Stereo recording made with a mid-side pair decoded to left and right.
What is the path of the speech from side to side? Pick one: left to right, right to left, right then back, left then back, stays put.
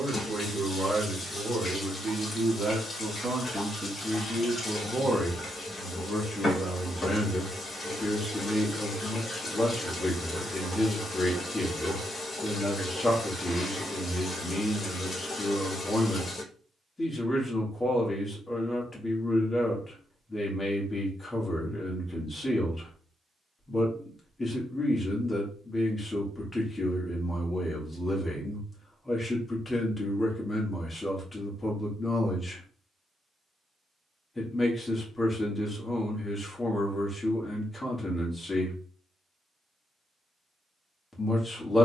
right to left.